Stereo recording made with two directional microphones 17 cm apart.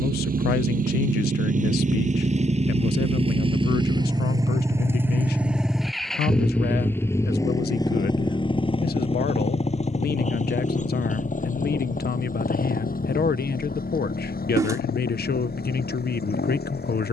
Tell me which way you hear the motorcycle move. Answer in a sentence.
In this clip you hear the motorcycle move from right to left.